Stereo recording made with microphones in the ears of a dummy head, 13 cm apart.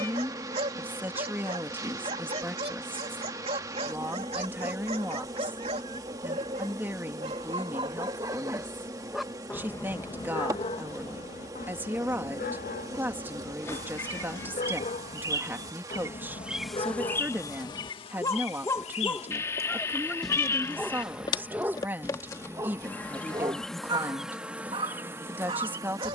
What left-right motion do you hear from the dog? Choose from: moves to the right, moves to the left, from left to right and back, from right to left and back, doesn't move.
from right to left and back.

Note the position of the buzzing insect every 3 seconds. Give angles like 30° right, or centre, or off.
20° right, 20° right, 20° right, 20° right, 20° right, centre, 40° left, 20° left, 10° right.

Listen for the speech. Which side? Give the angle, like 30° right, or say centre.
10° right.